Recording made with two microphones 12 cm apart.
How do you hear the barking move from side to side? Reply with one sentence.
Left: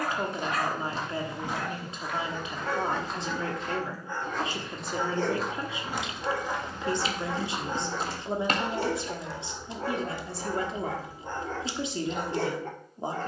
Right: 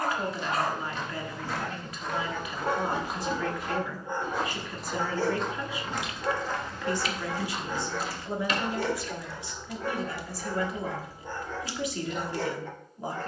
In this clip you hear the barking move from right to left.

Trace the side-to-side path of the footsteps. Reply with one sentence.
In this clip you hear the footsteps go right and come back.